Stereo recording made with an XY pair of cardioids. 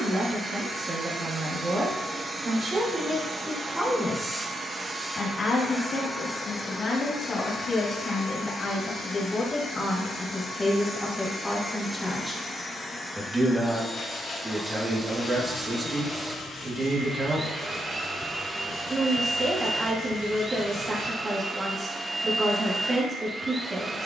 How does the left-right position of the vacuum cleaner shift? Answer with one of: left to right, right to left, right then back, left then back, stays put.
left then back.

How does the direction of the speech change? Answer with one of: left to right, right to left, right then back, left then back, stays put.
left then back.